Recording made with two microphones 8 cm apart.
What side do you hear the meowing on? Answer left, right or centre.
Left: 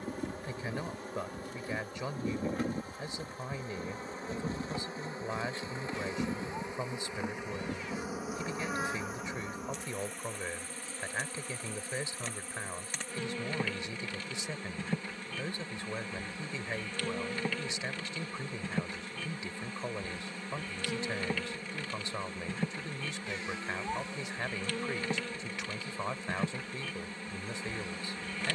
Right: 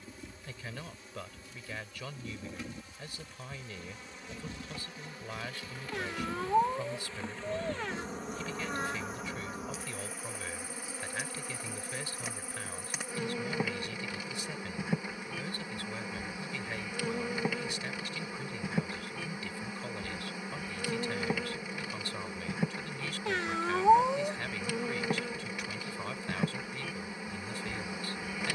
right.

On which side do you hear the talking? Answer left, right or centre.
left.